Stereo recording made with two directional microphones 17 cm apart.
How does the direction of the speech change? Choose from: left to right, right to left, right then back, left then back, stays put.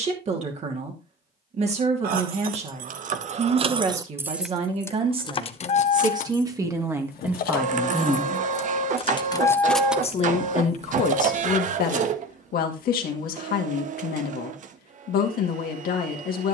right to left.